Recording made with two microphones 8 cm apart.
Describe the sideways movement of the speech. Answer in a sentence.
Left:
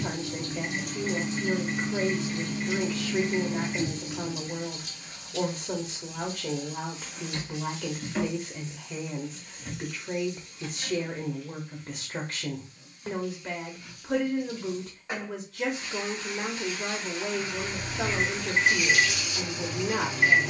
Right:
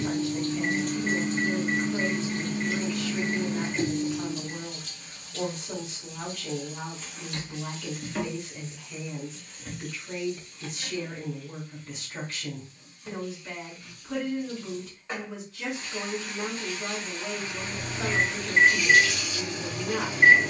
In this clip you hear the speech stay put.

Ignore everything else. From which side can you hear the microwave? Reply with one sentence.
In this clip you hear the microwave on the right.